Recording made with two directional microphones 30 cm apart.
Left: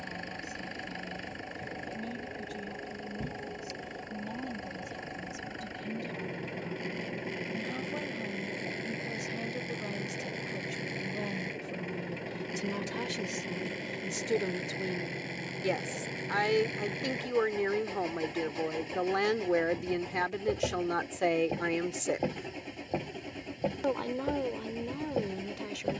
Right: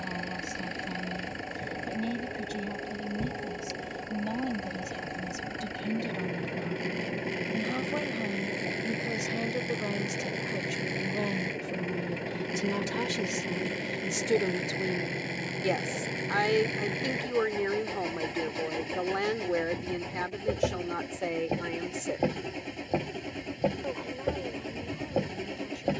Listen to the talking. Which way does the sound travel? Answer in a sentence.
In this clip you hear the talking move to the left.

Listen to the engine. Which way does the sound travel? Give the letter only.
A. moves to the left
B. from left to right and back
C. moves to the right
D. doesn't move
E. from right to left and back
D.